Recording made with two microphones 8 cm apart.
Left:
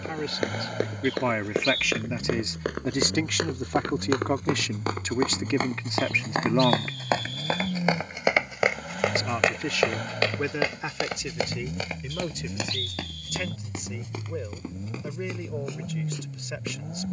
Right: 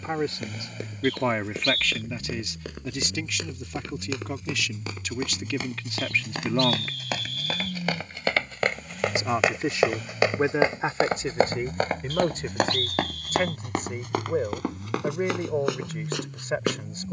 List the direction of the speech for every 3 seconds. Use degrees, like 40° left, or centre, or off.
centre, 40° left, 20° left, 30° right, 40° right, 40° right.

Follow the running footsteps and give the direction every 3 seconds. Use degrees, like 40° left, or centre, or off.
60° left, 50° left, 30° left, 20° right, 60° right, 70° right.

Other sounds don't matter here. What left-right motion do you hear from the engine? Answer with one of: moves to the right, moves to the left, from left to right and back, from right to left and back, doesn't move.
doesn't move.